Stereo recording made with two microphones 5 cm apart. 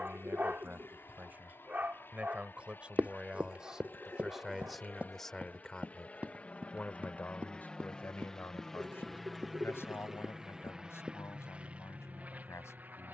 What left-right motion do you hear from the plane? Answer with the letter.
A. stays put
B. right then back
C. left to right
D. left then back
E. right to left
C.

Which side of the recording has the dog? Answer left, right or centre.
right.